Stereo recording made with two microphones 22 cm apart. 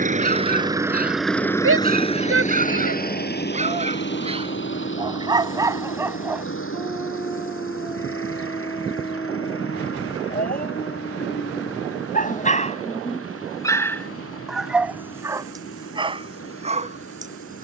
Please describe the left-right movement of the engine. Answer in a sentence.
You can hear the engine go from the right side to the left.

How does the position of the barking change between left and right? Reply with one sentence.
In this clip you hear the barking go left and come back.